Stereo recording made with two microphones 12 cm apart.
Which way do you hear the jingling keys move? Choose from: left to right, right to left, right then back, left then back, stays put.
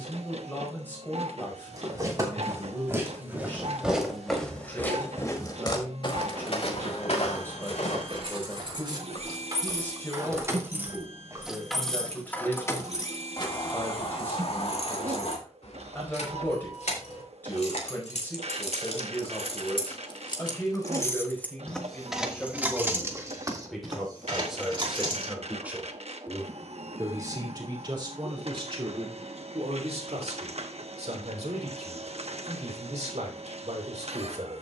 left then back.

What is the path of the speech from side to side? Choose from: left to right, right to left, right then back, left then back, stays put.
left to right.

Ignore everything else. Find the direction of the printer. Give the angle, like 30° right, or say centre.
60° right.